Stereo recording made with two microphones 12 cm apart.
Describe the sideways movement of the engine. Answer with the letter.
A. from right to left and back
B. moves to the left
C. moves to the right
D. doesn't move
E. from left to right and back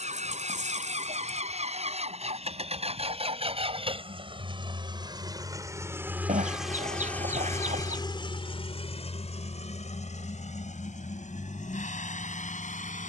B.